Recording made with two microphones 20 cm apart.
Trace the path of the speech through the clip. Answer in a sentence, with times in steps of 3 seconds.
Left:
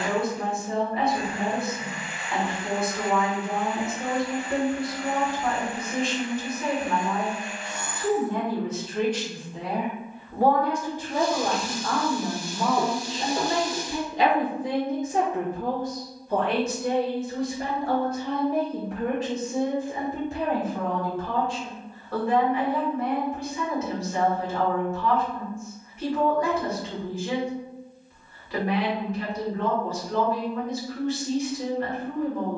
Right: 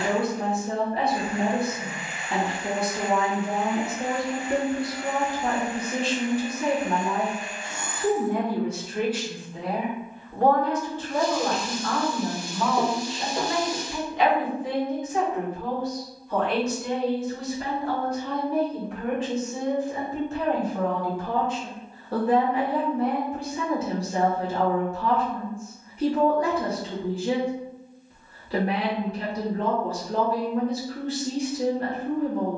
In this clip you hear the speech on the right from 0 s, in the centre from 9 s, on the left from 12 s and on the right from 21 s.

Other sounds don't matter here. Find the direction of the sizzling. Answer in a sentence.
You can hear the sizzling in the centre.